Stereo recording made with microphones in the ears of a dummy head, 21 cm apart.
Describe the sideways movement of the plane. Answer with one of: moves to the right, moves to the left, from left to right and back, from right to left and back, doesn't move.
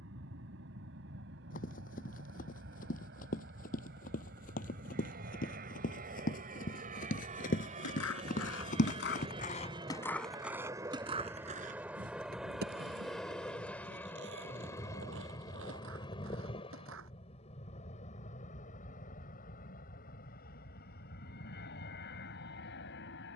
moves to the left.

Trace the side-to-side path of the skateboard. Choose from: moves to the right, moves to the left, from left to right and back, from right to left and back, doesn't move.
moves to the right.